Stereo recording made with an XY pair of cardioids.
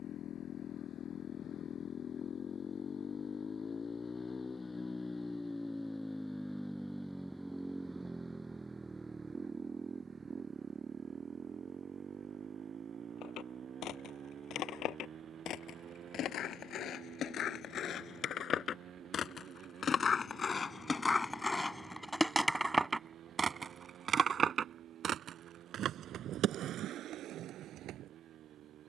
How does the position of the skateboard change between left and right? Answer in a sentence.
You can hear the skateboard move from left to right.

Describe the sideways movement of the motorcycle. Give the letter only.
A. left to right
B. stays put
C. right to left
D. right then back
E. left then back
A.